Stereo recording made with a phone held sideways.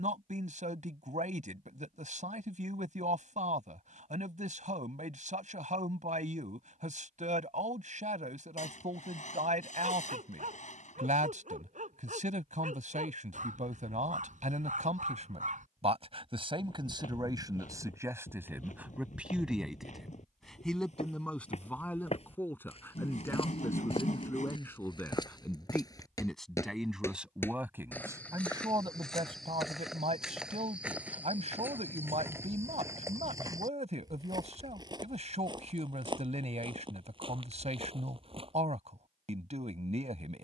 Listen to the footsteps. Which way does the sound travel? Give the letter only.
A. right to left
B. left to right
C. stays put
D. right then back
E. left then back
B.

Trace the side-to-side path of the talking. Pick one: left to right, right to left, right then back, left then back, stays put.
left then back.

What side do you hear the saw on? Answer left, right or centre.
left.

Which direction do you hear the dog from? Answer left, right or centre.
right.